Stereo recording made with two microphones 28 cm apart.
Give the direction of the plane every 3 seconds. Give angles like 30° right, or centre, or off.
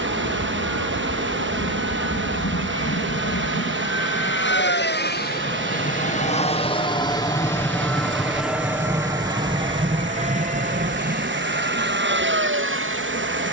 60° left, 40° left, 10° left, 20° right, 40° right.